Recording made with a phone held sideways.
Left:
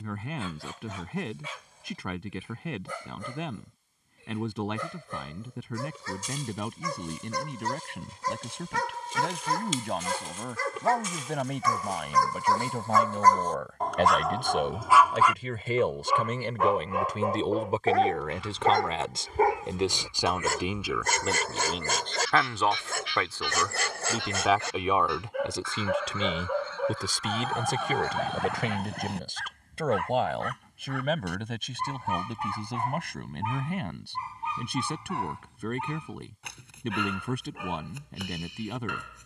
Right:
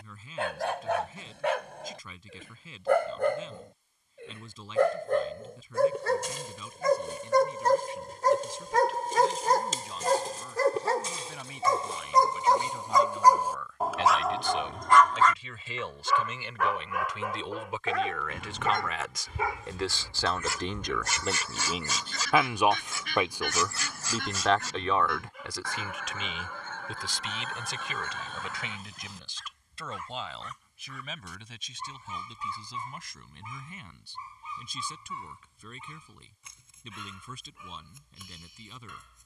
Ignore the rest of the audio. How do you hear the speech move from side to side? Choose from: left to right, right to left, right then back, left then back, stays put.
right then back.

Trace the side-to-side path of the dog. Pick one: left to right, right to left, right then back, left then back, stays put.
right to left.